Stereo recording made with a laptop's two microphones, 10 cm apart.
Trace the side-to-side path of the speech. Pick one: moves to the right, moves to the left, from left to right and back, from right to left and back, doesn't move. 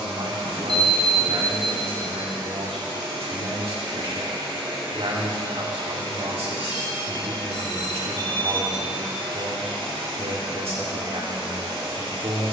doesn't move.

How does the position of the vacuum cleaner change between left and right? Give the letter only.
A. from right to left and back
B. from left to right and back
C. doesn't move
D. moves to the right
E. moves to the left
C.